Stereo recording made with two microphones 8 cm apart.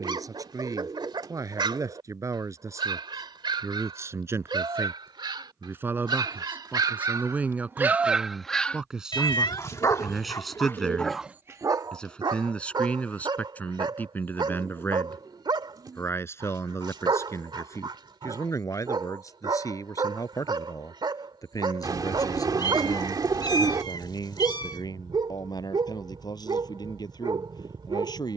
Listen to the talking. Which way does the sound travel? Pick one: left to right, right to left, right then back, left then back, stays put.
right to left.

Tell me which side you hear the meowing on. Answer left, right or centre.
left.